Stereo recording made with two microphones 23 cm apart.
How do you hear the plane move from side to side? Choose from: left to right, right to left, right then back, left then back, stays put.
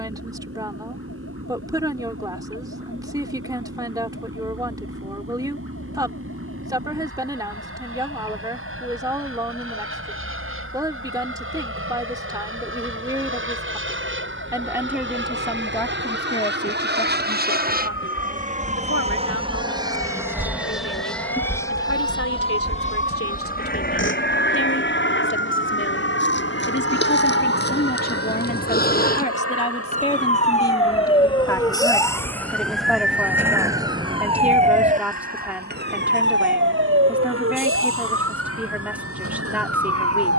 right to left.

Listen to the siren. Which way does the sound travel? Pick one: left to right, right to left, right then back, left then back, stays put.
left to right.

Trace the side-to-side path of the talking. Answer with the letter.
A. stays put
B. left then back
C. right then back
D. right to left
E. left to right
B.